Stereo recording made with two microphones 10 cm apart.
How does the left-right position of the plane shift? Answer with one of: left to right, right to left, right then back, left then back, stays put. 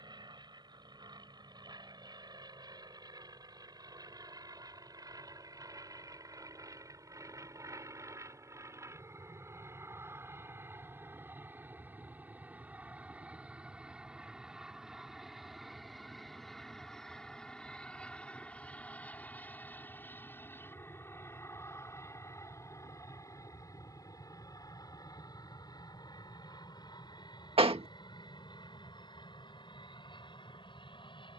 right to left.